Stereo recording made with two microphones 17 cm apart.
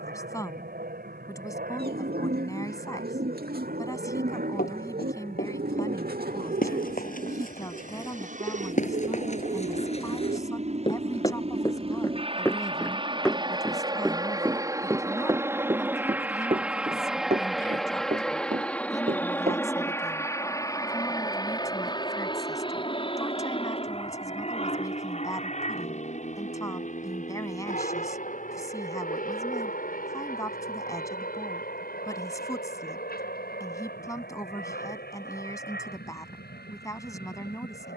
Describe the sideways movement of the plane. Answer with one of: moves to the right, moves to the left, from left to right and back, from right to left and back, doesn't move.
moves to the left.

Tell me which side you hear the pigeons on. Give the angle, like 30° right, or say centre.
60° right.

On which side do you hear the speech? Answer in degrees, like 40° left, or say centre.
20° left.